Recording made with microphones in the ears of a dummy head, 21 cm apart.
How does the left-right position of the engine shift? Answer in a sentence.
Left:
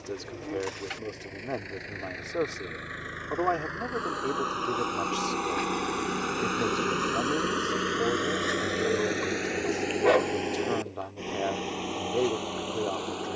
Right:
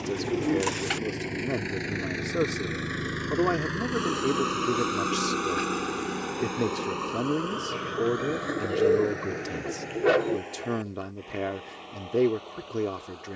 In this clip you hear the engine go from the right side to the left.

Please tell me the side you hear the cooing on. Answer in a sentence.
In this clip you hear the cooing on the right.